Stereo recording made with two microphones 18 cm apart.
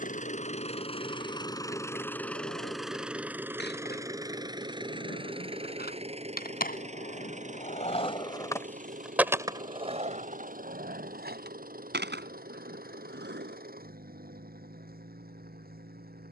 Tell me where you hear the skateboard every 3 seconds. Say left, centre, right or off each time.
left, left, left, right, right, off.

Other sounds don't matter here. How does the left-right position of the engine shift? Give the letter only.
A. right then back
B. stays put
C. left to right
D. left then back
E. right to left
C.